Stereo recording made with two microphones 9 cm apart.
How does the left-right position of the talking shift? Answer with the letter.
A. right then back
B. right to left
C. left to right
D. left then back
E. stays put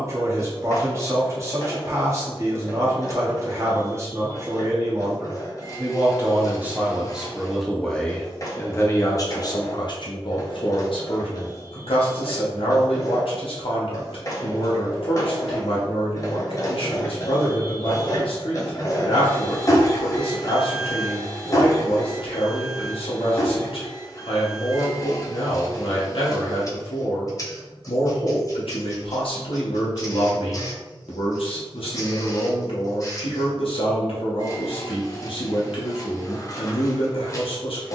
B.